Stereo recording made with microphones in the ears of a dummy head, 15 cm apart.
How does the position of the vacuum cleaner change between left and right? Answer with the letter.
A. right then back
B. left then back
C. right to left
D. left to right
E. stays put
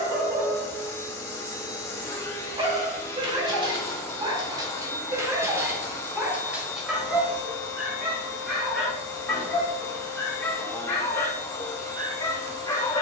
E.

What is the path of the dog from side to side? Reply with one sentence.
You can hear the dog move to the left.